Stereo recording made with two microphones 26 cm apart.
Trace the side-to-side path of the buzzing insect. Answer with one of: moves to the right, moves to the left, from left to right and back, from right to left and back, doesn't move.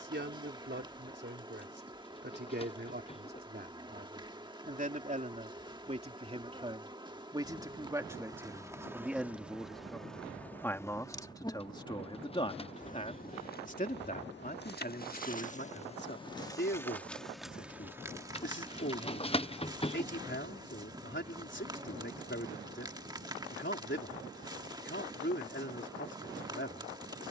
from right to left and back.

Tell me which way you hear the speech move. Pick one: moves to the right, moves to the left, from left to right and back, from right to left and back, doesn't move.
moves to the left.